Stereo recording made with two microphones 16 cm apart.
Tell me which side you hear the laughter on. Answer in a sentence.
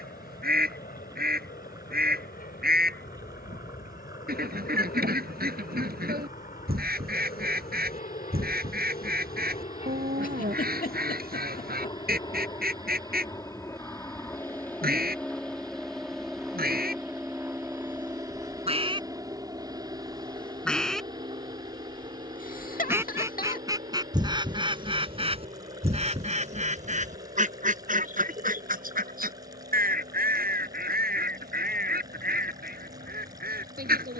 In this clip you hear the laughter on the left.